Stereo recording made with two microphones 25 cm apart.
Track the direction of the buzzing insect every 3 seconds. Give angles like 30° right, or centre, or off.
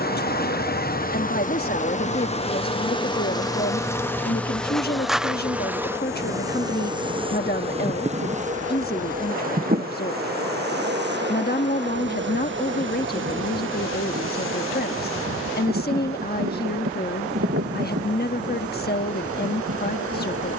30° left, centre, 20° right, 40° right, 50° right, 60° right, 60° right.